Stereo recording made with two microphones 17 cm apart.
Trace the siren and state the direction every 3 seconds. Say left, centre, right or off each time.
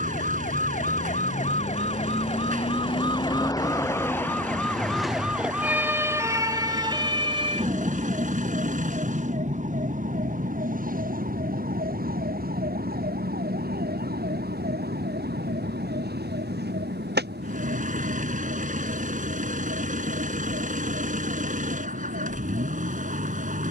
left, centre, right, right, right, right, right, right.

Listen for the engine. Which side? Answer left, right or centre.
right.